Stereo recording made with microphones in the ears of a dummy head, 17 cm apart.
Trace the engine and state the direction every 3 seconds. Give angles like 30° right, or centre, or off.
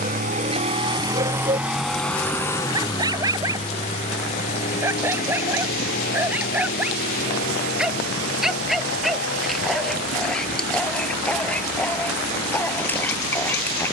10° right, 40° left, 50° left, 60° left, 60° left.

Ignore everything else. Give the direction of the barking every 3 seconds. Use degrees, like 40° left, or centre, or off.
30° right, 10° right, 10° right, centre, 10° left.